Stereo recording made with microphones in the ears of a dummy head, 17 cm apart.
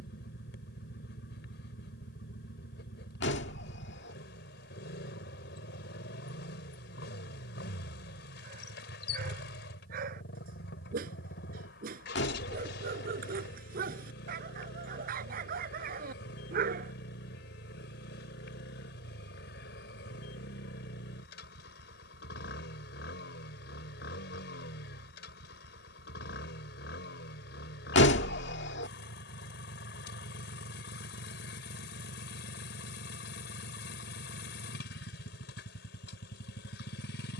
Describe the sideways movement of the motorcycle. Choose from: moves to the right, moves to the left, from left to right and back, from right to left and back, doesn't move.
doesn't move.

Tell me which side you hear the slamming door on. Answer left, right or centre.
left.